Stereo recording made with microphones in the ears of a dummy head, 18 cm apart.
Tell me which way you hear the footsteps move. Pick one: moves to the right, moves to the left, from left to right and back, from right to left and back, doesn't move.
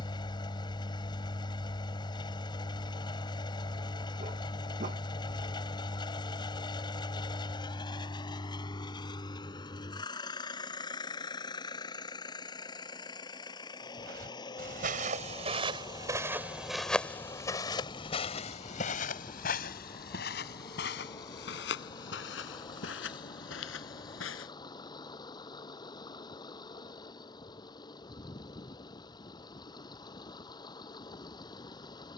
moves to the left.